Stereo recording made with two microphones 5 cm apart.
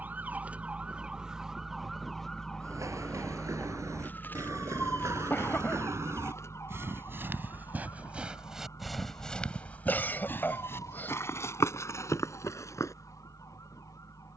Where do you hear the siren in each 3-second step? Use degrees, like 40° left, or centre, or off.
10° right, 40° left, 60° left, 70° left, 70° left.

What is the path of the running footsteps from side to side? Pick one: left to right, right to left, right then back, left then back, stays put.
right to left.